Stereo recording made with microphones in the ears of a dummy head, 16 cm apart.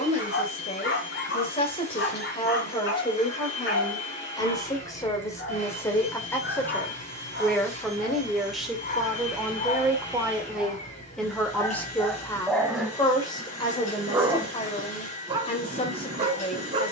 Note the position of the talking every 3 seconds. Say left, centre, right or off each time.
left, left, centre, centre, left, left.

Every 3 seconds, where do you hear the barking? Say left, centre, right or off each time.
left, left, left, left, centre, right.